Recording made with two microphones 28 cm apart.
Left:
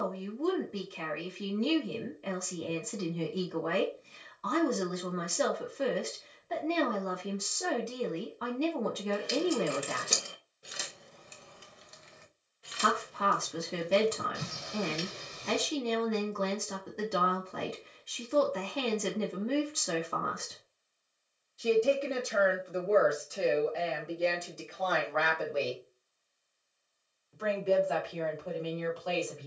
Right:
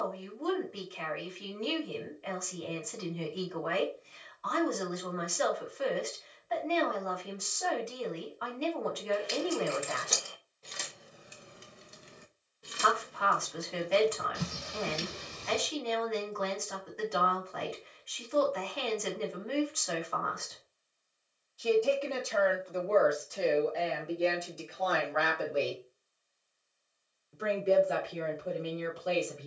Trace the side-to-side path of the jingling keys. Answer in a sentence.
You can hear the jingling keys move to the right.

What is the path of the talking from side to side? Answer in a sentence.
You can hear the talking move from left to right.